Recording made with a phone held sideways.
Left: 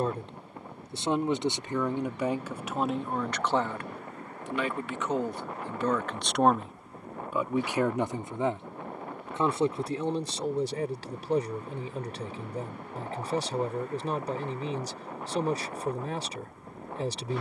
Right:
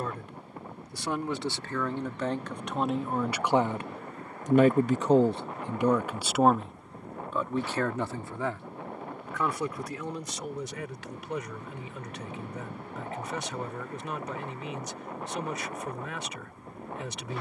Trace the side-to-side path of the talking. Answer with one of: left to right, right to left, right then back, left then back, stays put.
right then back.